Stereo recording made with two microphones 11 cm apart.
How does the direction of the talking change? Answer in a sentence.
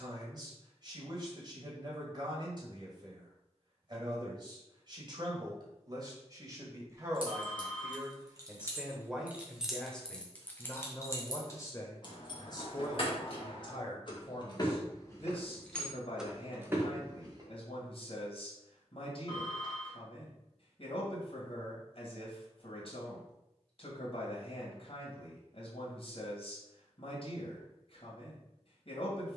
You can hear the talking go from the right side to the left.